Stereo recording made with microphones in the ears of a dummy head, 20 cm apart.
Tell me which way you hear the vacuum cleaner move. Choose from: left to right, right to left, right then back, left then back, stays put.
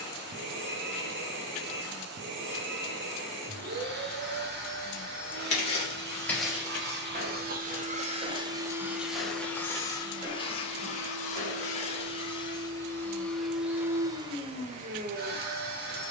left then back.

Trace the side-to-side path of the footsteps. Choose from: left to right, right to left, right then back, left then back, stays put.
right then back.